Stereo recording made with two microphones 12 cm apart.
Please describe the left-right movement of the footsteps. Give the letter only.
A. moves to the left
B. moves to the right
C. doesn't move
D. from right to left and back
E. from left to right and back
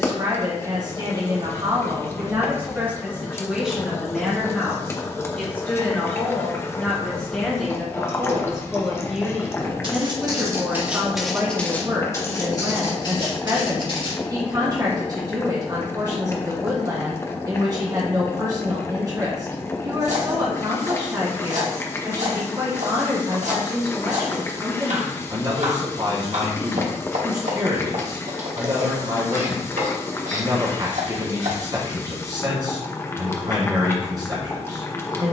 A.